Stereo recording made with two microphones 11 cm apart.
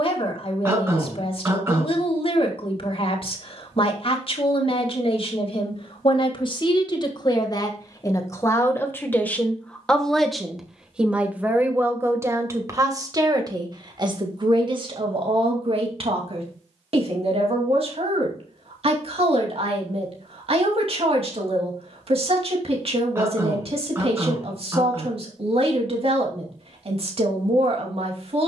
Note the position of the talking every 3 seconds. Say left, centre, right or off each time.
left, left, left, centre, right, right, right, right, right, right.